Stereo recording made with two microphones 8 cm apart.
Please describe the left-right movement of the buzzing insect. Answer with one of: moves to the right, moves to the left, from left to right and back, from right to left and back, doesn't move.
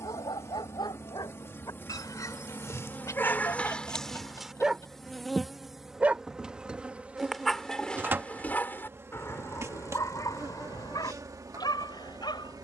moves to the right.